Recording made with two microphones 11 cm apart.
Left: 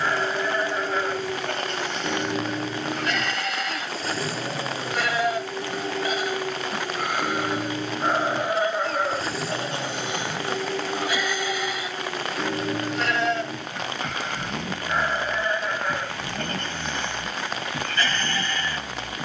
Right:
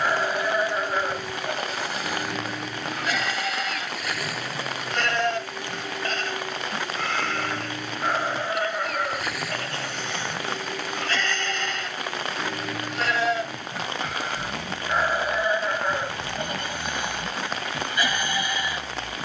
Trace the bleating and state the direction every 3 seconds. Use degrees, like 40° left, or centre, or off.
10° right, centre, 10° left, 10° left, 10° right, 10° right, 10° right.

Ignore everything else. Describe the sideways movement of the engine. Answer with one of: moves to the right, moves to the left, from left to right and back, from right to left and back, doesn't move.
doesn't move.